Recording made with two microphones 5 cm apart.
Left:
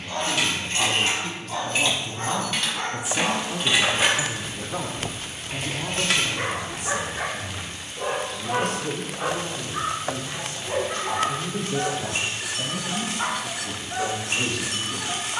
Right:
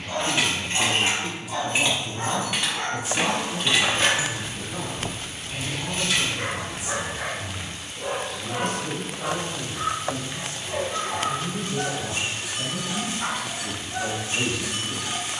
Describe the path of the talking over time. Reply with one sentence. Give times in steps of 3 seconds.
You can hear the talking in the centre from 0 s, on the left from 3 s and in the centre from 12 s.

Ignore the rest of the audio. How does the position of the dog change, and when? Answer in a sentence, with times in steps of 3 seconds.
You can hear the dog in the centre from 0 s and on the left from 6 s.